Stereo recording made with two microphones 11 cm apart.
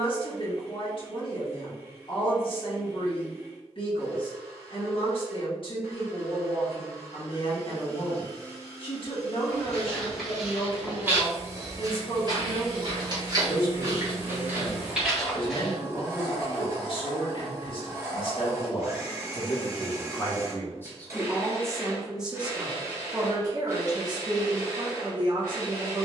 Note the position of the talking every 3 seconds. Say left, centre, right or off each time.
left, left, left, left, left, left, left, centre, right.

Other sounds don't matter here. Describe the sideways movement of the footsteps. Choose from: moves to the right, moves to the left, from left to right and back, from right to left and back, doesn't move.
from left to right and back.